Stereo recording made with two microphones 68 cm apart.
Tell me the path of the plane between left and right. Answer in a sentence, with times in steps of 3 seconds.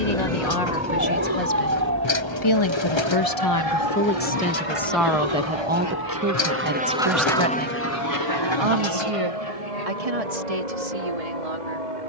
In this clip you hear the plane on the right from 0 s, in the centre from 6 s and on the left from 9 s.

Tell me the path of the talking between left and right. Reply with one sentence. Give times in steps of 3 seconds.
In this clip you hear the talking on the left from 0 s, in the centre from 3 s and on the right from 6 s.